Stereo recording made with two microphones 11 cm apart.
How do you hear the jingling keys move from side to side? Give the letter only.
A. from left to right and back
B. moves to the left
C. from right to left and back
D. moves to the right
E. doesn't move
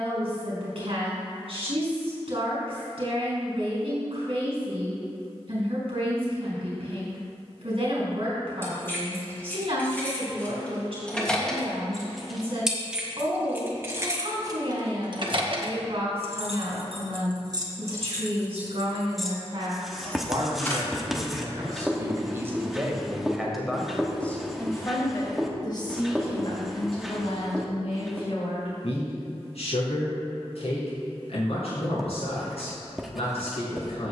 A.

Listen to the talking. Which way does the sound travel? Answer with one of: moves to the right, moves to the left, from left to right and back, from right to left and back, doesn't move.
moves to the left.